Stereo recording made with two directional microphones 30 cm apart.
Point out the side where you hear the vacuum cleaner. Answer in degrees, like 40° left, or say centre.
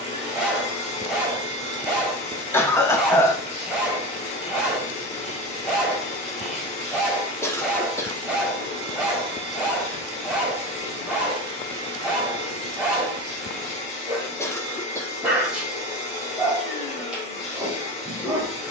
20° left.